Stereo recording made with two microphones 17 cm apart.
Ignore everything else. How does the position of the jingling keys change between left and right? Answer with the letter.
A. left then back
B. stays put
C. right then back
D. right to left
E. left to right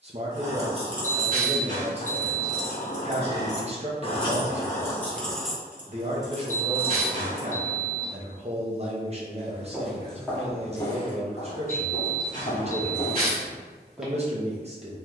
A.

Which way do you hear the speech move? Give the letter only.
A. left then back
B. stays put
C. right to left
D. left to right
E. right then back
B.